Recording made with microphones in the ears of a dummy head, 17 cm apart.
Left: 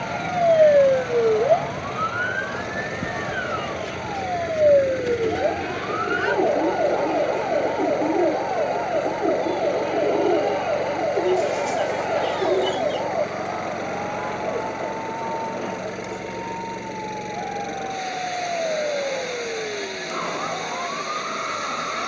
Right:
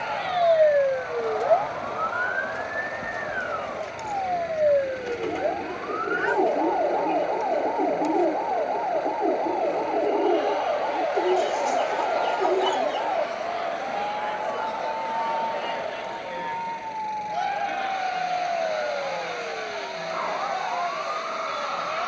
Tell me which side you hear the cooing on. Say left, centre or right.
centre.